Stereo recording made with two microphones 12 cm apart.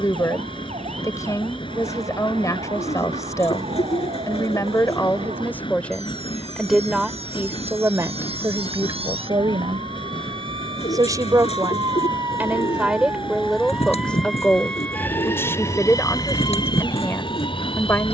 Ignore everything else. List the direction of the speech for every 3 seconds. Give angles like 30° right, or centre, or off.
30° left, 20° left, 20° right, 30° right, centre, 20° left.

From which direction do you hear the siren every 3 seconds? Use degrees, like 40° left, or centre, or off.
80° right, 70° right, 60° right, 50° right, 10° right, 40° left.